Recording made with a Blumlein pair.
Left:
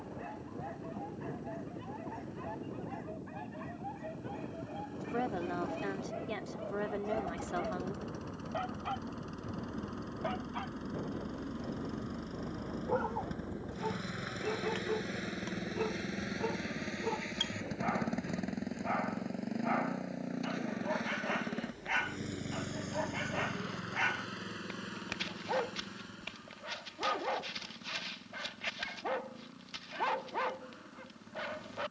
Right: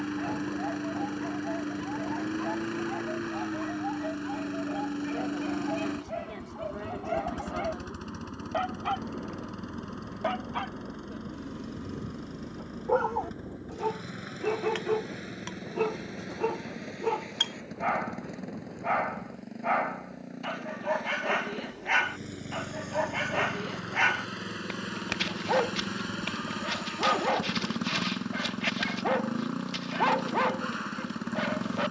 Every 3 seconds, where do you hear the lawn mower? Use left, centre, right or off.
right, right, right, centre, centre, centre, centre, centre, right, right, right.